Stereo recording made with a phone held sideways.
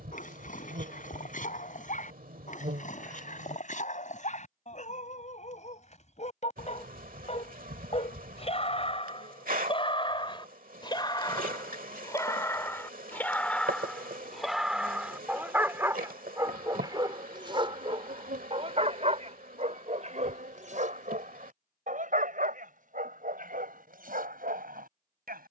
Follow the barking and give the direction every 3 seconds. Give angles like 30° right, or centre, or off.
60° left, 50° left, 40° left, 30° left, 10° left, 20° right, 50° right, 60° right, 70° right.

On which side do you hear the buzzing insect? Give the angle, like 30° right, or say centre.
70° right.